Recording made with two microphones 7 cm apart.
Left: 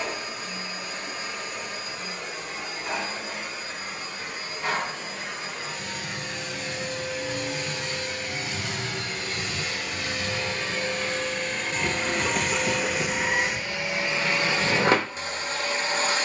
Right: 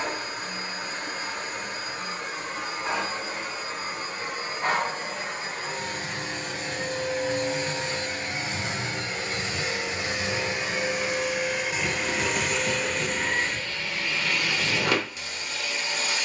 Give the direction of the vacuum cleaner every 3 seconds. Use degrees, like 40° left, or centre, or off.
40° right, 40° right, 30° right, 20° right, 10° left, 40° left.